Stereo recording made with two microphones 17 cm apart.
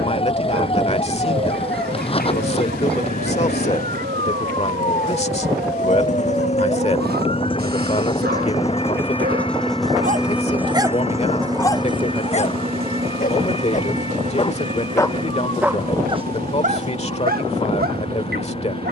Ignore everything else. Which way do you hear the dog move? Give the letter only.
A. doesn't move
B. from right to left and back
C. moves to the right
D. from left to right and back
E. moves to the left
B.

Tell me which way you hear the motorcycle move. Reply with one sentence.
You can hear the motorcycle travel towards the right.